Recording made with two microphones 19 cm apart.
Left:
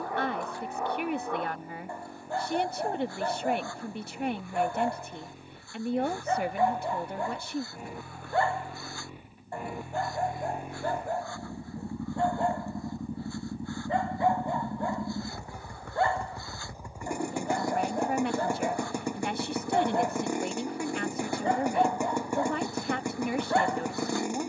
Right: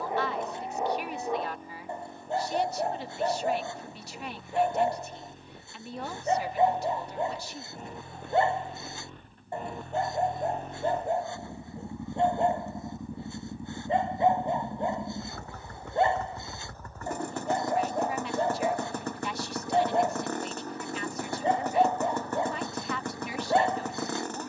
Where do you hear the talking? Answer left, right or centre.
left.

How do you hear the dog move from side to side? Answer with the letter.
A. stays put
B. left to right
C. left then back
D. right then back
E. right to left
A.